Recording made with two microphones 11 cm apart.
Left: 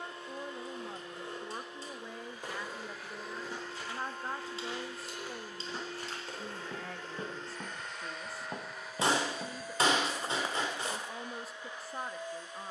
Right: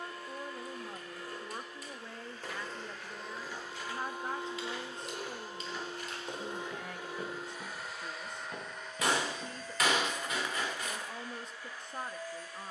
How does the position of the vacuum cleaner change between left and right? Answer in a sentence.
You can hear the vacuum cleaner go right and come back.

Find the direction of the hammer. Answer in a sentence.
In this clip you hear the hammer on the left.